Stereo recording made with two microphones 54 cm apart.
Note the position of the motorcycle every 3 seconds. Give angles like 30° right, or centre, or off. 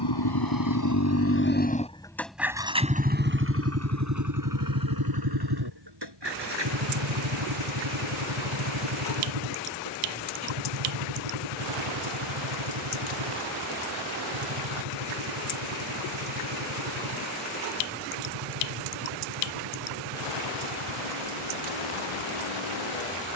20° left, 40° right, 60° right, 60° right, 70° right, 70° right, 70° right, 70° right.